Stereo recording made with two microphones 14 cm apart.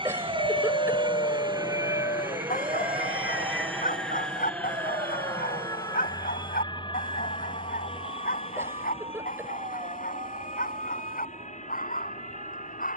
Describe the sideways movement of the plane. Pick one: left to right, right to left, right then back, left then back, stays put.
right to left.